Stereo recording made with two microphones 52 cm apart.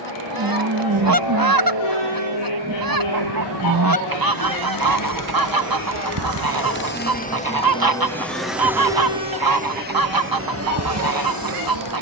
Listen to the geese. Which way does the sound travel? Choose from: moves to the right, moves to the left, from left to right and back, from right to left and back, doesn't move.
doesn't move.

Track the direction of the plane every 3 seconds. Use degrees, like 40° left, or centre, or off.
60° left, 40° left, 10° left, 20° right.